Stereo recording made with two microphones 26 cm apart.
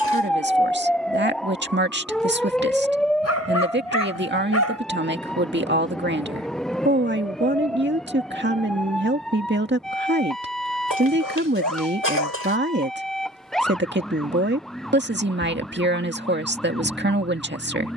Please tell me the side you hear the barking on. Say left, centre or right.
left.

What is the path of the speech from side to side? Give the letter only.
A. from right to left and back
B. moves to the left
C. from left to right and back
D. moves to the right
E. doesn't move
E.